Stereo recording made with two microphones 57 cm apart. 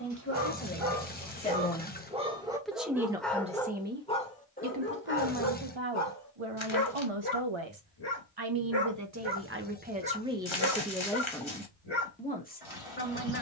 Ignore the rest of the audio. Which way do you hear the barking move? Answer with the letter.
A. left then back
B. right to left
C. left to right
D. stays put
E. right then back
B.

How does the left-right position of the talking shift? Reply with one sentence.
You can hear the talking go right and come back.